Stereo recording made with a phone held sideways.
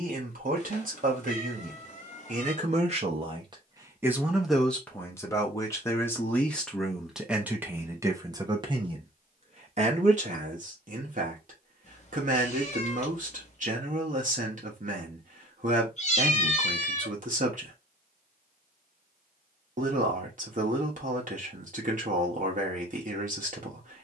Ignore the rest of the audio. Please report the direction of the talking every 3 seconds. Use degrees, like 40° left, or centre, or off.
60° right, centre, 10° right, 50° right, 50° right, 50° right, 50° right, 50° right.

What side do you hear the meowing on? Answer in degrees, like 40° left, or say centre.
50° left.